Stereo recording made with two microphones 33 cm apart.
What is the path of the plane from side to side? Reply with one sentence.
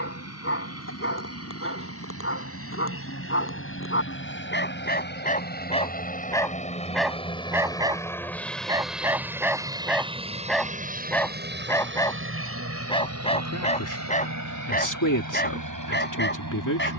In this clip you hear the plane travel towards the right.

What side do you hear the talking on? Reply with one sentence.
In this clip you hear the talking on the left.